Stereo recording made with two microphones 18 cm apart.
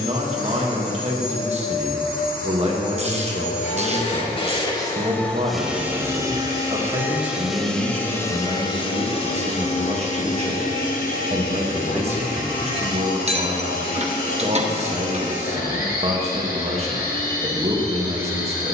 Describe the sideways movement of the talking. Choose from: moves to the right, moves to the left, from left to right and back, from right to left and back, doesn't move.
doesn't move.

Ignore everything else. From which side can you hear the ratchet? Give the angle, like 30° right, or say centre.
40° right.